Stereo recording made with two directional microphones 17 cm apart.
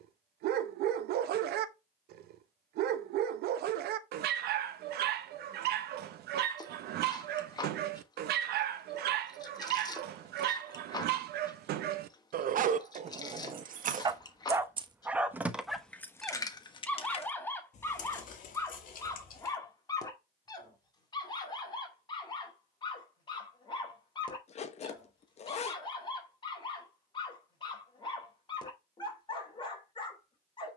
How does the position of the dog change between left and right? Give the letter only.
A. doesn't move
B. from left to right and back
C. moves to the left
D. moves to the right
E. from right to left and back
C.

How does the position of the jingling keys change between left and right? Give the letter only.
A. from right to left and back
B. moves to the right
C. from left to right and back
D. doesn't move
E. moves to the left
E.